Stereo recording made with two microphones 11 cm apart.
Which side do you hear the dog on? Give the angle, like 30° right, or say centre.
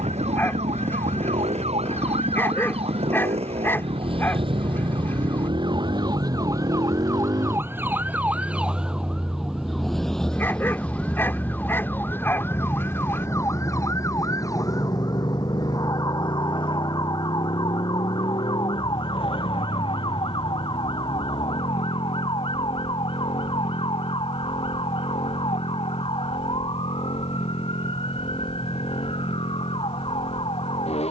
20° left.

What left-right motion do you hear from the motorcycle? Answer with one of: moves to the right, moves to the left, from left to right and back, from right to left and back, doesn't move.
moves to the left.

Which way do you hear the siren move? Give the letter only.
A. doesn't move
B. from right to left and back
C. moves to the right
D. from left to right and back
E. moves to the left
E.